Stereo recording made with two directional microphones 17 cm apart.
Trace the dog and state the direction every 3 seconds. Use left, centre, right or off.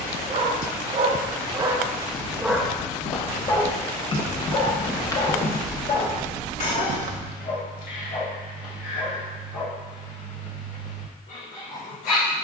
right, left, left, left.